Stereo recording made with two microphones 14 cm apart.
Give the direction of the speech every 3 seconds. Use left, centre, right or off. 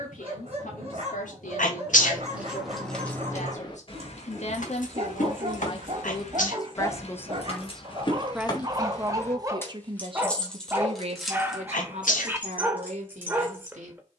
left, left, centre, right, right.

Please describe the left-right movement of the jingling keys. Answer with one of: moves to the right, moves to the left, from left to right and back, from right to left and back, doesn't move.
from right to left and back.